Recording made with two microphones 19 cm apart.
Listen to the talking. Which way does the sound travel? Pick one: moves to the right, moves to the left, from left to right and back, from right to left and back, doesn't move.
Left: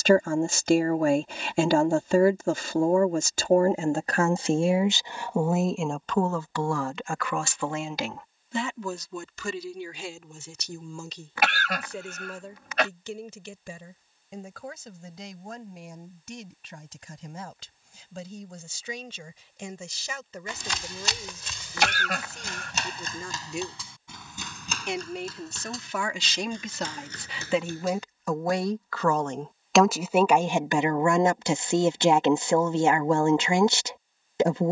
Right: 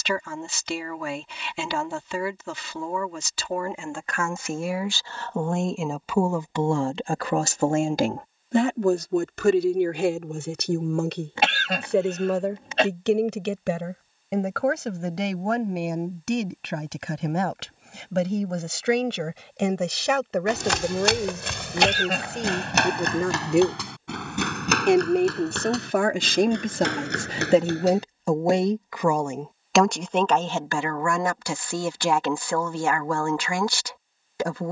from left to right and back.